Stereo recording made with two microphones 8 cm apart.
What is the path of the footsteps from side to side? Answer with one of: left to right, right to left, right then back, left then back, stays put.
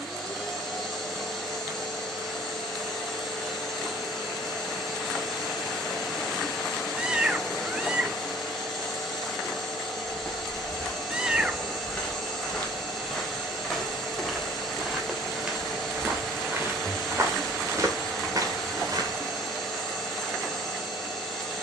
left to right.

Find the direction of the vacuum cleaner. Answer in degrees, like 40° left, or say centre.
centre.